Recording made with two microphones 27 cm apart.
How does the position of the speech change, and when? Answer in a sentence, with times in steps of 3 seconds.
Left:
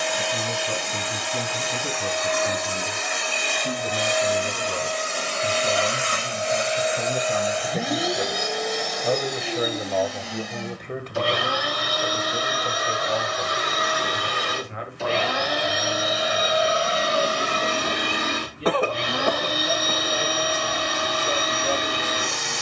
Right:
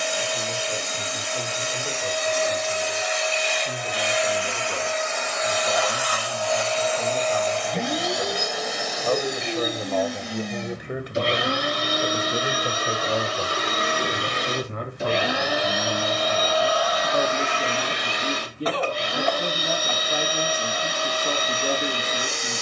You can hear the speech on the left from 0 s, in the centre from 9 s and on the right from 12 s.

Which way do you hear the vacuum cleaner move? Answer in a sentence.
In this clip you hear the vacuum cleaner move from left to right and back again.